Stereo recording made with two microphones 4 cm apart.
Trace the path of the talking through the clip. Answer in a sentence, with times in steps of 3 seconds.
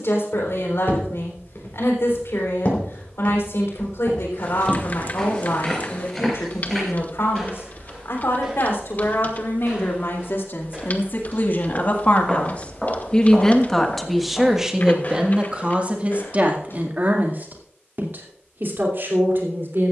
In this clip you hear the talking on the left from 0 s, in the centre from 12 s and on the right from 15 s.